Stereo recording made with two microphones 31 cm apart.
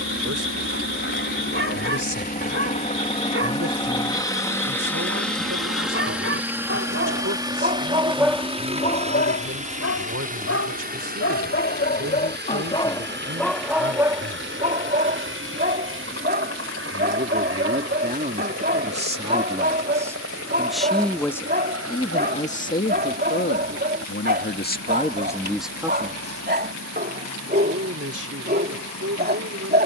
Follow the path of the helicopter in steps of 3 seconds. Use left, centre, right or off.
left, centre, centre, right, right, right, right, right, right, right.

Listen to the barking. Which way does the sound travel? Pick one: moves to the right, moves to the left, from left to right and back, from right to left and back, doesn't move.
from right to left and back.